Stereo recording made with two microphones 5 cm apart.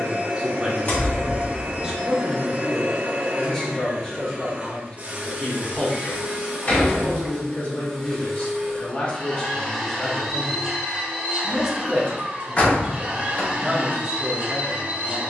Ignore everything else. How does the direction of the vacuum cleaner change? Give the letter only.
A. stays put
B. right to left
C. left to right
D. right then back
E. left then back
E.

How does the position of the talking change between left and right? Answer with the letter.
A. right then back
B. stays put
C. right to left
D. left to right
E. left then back
E.